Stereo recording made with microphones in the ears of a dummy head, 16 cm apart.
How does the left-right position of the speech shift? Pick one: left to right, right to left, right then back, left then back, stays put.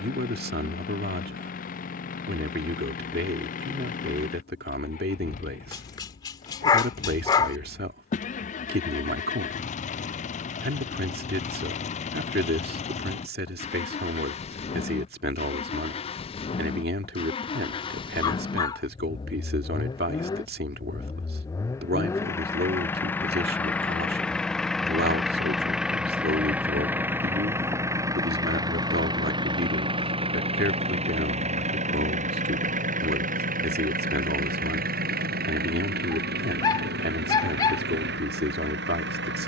stays put.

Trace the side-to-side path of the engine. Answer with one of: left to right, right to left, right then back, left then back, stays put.
left to right.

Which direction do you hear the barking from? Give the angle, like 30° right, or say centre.
20° left.